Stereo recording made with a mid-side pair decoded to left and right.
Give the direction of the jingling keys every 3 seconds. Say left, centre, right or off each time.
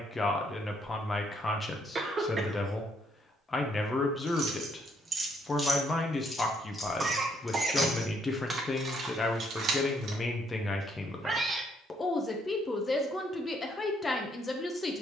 off, right, centre, right, off.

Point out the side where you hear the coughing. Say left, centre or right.
right.